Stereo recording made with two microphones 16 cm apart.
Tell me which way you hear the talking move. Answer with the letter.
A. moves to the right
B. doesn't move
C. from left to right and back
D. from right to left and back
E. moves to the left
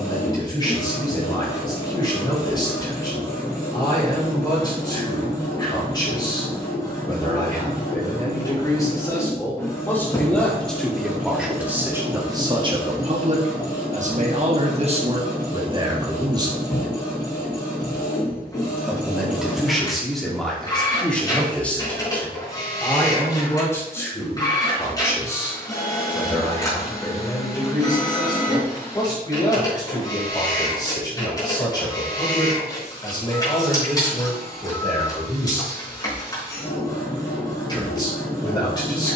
C.